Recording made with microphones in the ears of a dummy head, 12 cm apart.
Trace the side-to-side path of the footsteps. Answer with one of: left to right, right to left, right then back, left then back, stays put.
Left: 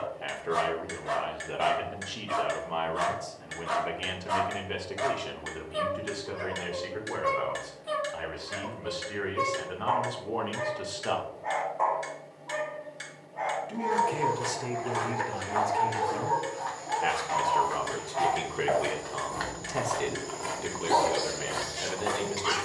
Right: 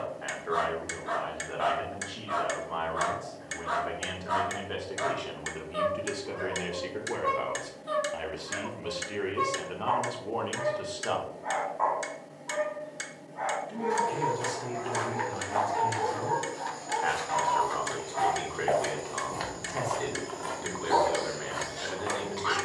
right to left.